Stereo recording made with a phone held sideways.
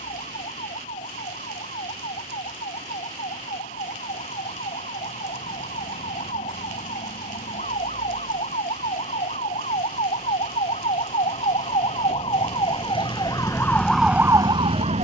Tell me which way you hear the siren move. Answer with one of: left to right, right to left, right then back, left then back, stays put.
left to right.